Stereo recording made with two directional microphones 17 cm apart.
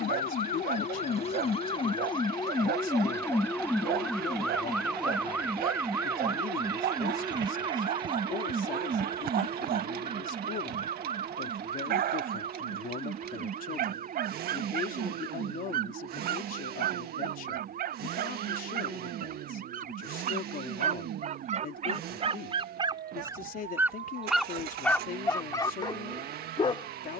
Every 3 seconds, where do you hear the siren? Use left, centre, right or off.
left, centre, right, right, right, right, right, right, right.